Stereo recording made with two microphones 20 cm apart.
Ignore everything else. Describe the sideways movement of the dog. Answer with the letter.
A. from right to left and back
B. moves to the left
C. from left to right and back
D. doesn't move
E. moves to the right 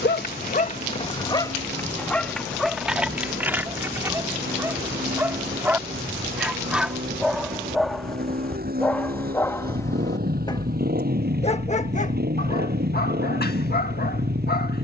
C.